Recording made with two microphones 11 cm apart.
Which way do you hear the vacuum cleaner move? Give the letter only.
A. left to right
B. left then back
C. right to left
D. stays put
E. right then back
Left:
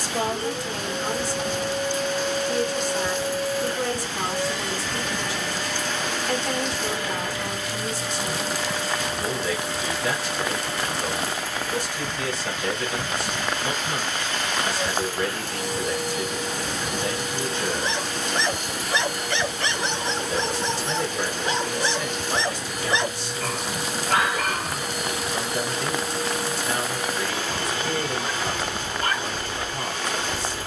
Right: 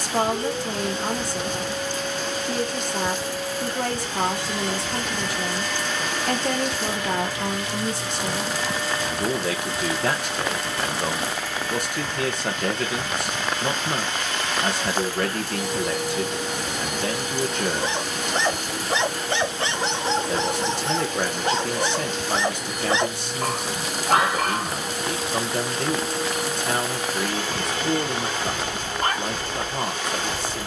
D.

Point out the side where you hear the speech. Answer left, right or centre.
right.